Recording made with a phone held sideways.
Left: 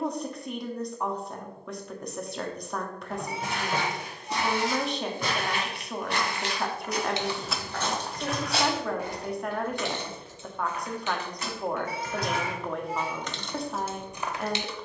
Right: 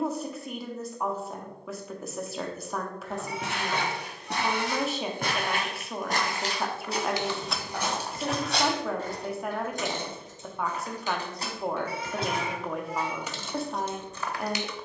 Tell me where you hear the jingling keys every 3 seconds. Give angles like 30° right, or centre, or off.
off, off, centre, 40° right, centre.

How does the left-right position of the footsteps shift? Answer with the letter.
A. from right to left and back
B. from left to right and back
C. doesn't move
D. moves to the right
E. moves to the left
E.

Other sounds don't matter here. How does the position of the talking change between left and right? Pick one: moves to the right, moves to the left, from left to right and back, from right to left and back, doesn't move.
doesn't move.